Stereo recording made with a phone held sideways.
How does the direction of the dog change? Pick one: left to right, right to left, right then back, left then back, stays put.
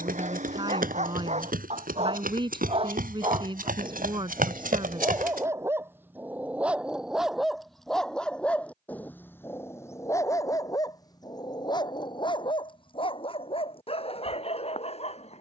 right to left.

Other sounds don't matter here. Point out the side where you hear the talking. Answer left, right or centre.
right.